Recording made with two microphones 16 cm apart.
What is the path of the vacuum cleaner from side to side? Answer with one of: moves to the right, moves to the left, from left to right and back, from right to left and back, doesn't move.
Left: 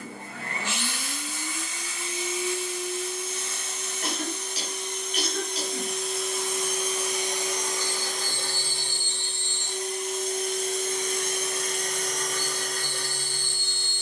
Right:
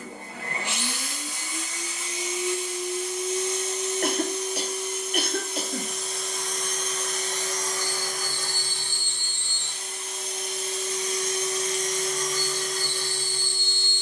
moves to the left.